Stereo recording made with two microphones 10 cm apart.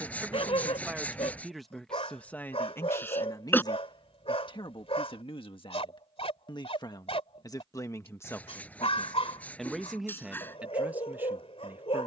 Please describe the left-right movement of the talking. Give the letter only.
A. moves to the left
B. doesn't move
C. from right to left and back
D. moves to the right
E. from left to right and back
C.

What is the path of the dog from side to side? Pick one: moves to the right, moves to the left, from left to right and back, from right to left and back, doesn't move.
doesn't move.